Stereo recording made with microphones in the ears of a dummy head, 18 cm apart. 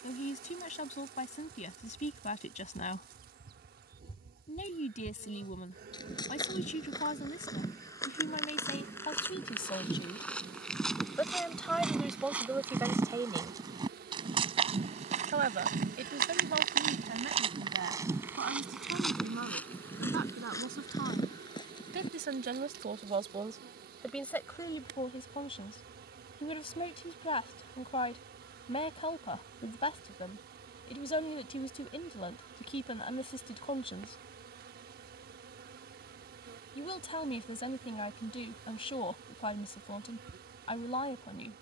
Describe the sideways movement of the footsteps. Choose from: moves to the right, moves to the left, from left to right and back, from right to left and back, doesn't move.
from left to right and back.